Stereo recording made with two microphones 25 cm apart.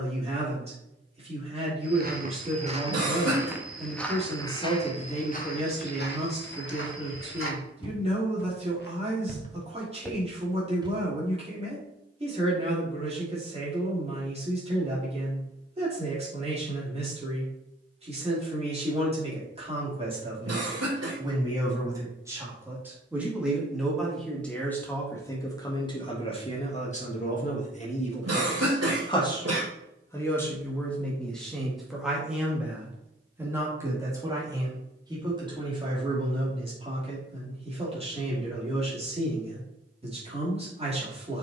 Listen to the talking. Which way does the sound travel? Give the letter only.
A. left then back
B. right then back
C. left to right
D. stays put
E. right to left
A.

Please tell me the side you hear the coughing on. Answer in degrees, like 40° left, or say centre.
80° right.